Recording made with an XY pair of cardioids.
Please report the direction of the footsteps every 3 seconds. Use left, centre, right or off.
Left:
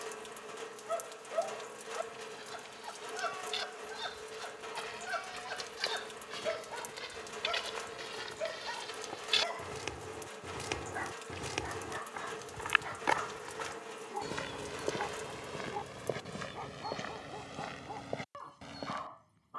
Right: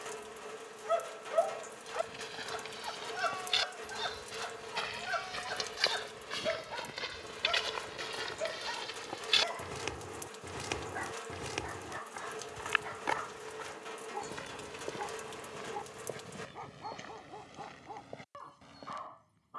right, right, right, centre, left, left, left.